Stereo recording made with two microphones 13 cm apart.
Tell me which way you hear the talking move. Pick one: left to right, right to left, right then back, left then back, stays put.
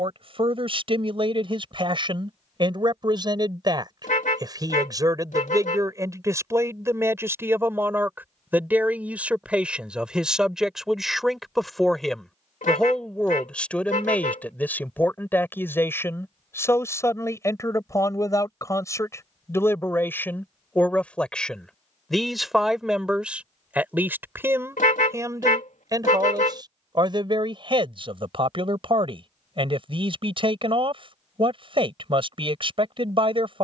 left then back.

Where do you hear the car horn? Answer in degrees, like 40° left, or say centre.
80° left.